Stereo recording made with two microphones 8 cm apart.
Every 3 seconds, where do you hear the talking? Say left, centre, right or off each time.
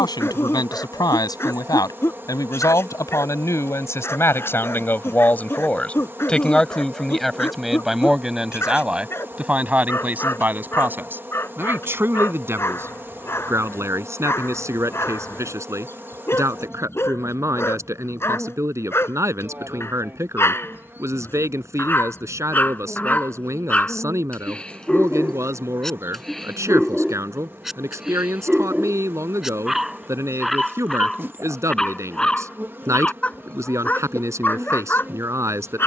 left, left, centre, right, right, right, right, right, right, right, right, right.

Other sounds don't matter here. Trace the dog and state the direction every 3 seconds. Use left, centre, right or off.
left, left, left, left, left, left, left, left, centre, centre, centre, left.